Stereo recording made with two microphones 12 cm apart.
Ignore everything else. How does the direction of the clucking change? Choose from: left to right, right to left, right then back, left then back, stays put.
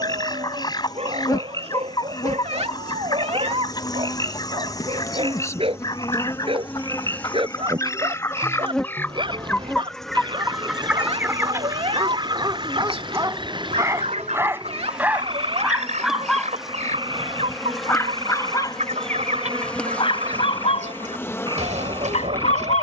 left to right.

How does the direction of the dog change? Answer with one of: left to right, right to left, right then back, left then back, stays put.
right to left.